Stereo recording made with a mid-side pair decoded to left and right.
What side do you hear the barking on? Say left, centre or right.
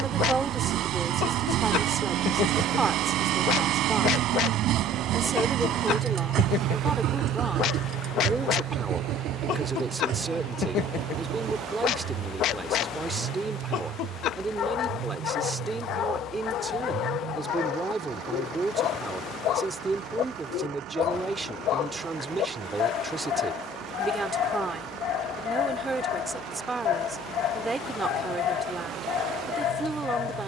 left.